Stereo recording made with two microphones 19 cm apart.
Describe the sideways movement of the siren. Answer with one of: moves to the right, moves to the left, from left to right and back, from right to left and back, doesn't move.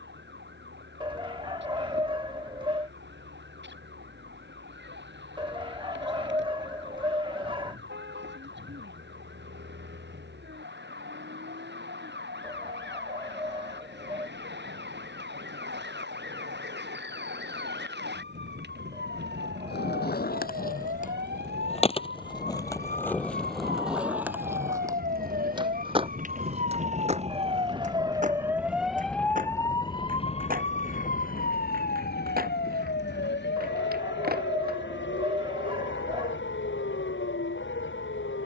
moves to the left.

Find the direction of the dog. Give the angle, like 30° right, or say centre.
30° right.